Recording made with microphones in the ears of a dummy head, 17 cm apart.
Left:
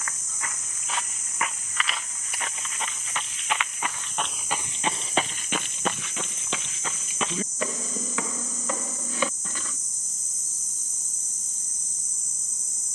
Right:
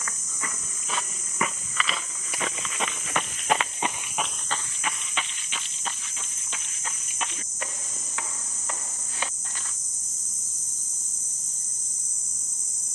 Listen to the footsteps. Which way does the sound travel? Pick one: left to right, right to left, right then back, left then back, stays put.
right to left.